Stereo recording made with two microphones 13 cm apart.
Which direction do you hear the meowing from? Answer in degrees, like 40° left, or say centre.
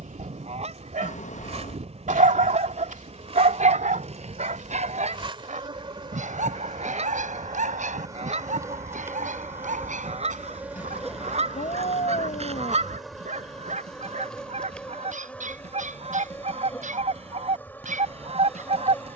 70° left.